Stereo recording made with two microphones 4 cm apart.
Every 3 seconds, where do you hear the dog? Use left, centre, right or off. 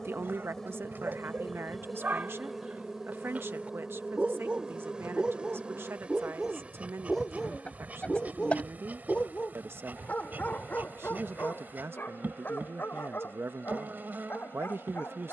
right, right, centre, left, left.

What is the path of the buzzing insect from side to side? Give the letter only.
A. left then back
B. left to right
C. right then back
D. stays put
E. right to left
B.